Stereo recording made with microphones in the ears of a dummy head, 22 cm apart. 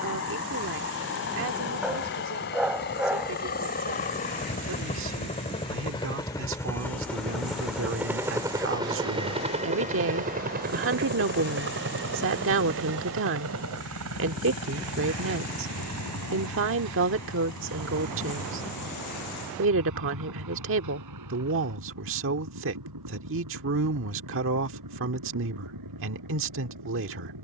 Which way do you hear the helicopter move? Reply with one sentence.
In this clip you hear the helicopter move from left to right.